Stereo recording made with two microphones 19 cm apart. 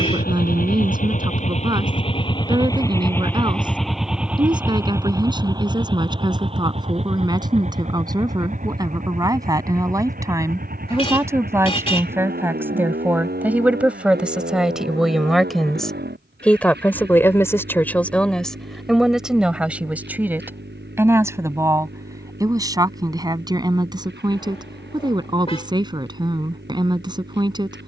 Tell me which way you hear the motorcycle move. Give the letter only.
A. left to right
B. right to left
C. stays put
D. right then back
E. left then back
A.